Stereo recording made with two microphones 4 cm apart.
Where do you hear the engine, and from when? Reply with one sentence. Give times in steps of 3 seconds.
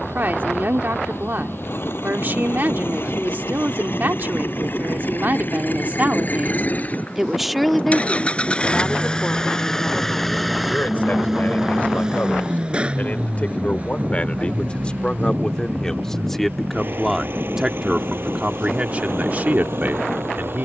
You can hear the engine on the left from 0 s, in the centre from 9 s and on the right from 12 s.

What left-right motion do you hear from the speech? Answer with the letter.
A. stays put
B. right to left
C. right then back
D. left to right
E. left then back
E.